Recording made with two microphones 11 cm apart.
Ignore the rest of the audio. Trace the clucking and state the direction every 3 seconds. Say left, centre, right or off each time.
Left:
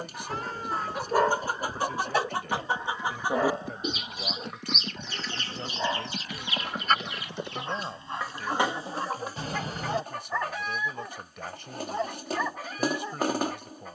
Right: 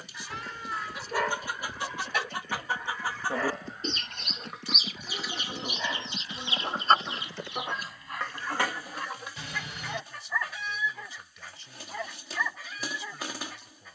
left, centre, centre, left, left.